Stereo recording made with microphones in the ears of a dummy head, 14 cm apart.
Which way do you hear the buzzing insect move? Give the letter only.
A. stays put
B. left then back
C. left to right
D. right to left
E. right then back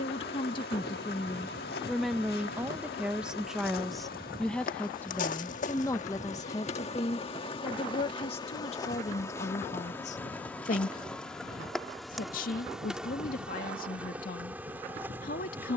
C.